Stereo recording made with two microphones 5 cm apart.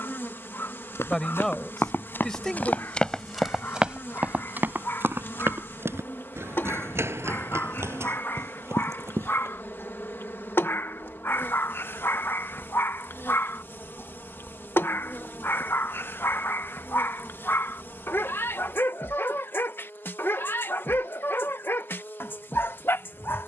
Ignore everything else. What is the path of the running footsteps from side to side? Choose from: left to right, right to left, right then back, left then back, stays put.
left to right.